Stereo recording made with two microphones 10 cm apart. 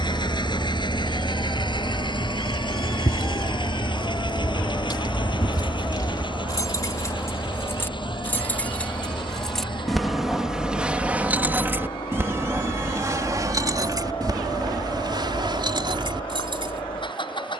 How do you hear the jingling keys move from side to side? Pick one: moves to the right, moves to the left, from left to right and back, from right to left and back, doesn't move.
moves to the right.